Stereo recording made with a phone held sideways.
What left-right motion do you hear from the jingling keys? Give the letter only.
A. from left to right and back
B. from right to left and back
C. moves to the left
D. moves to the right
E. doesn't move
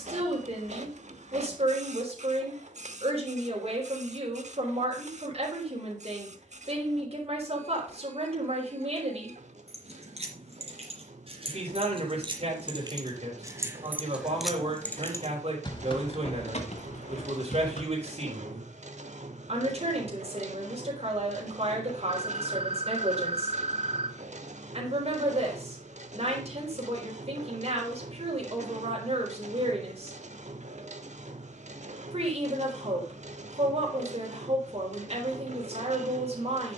C.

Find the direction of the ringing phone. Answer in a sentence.
In this clip you hear the ringing phone on the right.